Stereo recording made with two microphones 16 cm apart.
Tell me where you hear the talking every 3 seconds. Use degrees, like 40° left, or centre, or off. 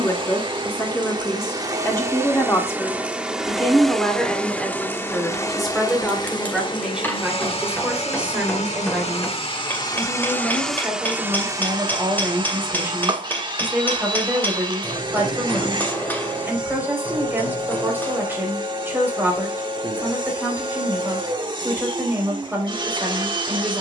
20° left, centre, 10° right, 10° right, 20° right, 20° right, 20° right, 20° right.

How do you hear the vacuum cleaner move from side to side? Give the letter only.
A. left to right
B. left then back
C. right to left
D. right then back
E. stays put
B.